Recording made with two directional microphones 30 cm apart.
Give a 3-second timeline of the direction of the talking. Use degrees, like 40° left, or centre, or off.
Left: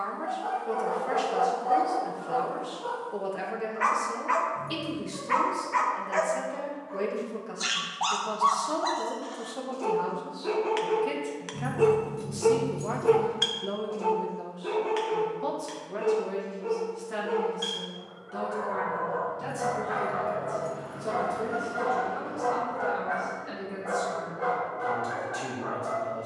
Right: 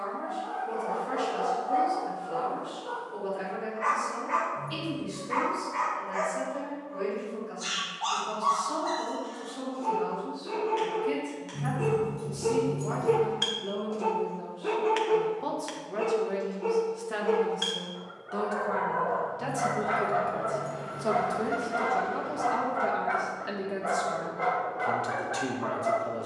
60° left, 60° left, 60° left, 50° left, 30° left, 10° right, 40° right, 40° right, 40° right.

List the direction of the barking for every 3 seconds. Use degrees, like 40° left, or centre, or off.
70° left, 70° left, 70° left, 60° left, centre, 40° right, 60° right, 60° right, 60° right.